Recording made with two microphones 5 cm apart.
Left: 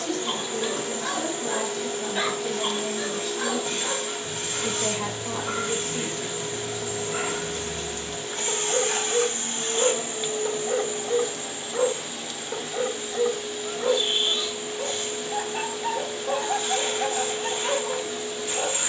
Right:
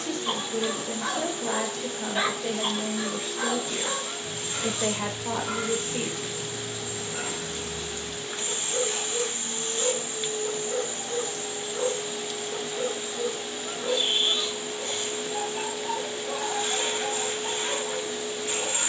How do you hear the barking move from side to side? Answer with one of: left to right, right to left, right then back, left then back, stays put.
right to left.